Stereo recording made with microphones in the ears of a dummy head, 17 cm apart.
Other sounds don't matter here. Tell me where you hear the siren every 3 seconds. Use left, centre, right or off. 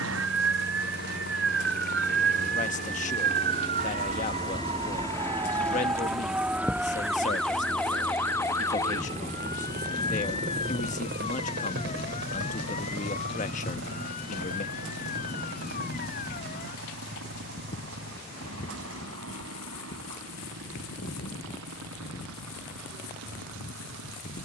right, right, centre, left, left, left, left, left.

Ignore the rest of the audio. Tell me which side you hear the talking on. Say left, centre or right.
left.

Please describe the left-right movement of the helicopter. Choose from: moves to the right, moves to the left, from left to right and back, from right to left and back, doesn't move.
moves to the right.